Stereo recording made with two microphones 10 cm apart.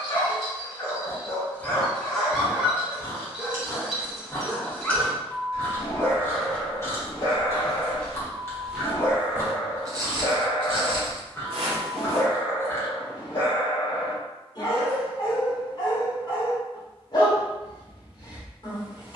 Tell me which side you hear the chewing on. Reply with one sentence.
In this clip you hear the chewing on the left.